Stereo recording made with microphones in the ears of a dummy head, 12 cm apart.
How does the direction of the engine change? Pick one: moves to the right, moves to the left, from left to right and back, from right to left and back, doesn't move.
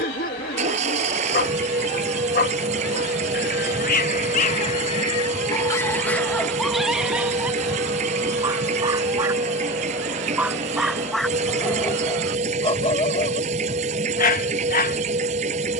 doesn't move.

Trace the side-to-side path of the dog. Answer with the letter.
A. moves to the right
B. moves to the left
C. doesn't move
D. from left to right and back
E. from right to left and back
D.